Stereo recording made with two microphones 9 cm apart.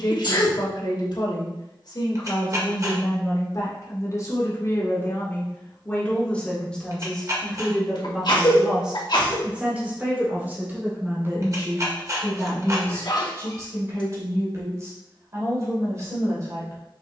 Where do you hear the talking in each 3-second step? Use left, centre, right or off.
left, left, centre, right, right, right.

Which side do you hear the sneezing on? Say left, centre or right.
left.